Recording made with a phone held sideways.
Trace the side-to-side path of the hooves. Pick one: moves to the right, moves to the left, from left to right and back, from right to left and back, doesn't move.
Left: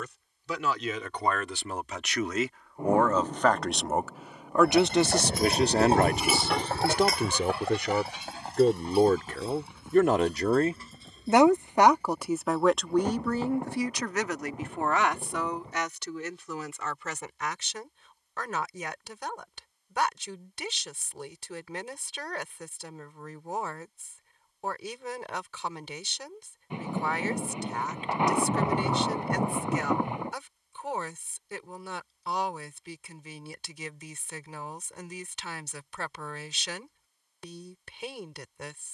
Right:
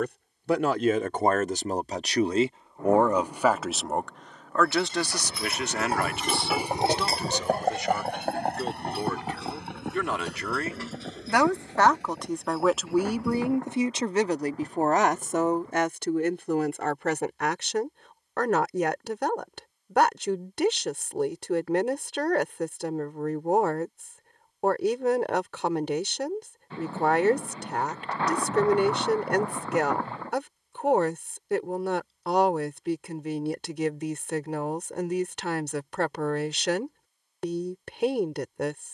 moves to the right.